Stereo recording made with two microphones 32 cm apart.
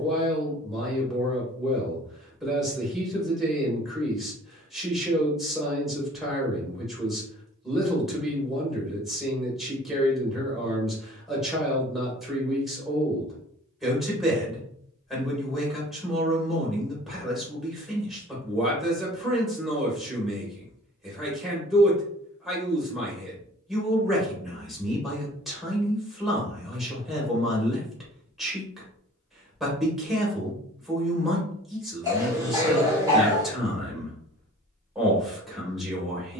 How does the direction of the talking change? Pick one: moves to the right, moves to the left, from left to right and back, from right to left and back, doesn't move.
doesn't move.